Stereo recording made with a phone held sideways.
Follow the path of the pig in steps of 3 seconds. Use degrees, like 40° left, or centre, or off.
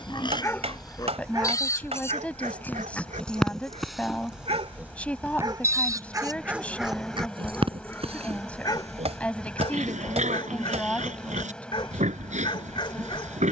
20° left, 10° right, 40° right, 50° right, 50° right.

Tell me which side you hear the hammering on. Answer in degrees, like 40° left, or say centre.
40° right.